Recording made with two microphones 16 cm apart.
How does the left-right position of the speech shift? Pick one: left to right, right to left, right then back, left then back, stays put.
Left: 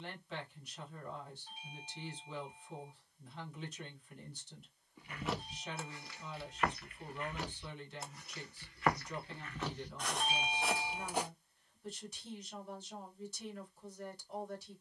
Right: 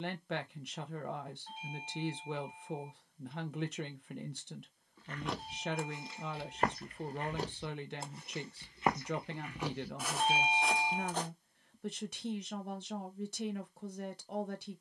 stays put.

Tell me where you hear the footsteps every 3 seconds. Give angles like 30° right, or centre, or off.
off, centre, 30° right, centre, off.